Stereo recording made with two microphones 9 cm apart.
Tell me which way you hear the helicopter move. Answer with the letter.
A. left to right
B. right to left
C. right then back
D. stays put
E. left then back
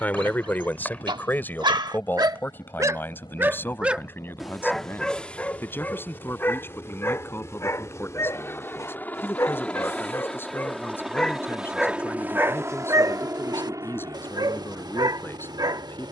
A.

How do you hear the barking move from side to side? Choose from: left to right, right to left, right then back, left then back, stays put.
left then back.